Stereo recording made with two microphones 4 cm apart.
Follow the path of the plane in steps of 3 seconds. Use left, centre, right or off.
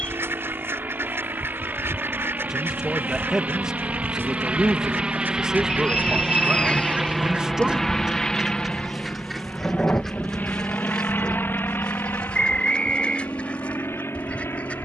right, right, centre, left, left.